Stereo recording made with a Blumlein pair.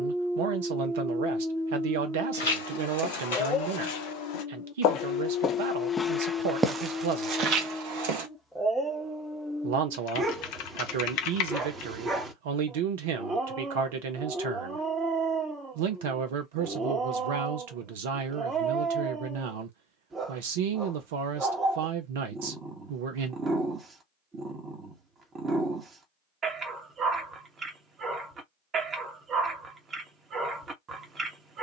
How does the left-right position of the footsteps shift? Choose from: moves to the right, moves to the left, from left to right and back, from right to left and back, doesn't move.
moves to the right.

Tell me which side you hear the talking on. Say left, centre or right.
right.